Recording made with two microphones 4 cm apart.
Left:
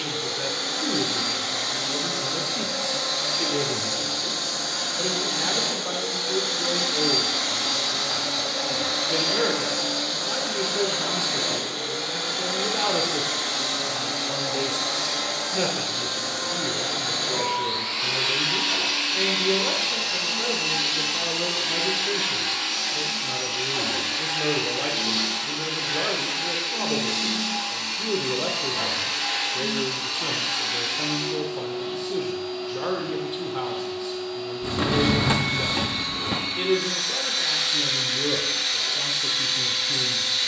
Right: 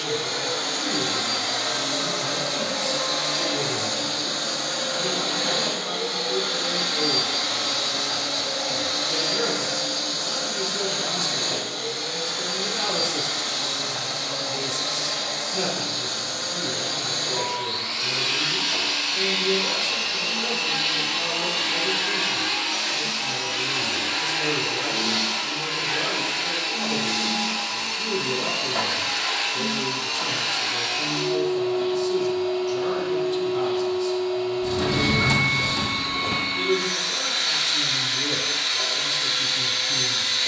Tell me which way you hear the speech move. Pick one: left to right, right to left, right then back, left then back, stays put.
stays put.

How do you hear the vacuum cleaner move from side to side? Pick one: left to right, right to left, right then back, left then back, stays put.
left then back.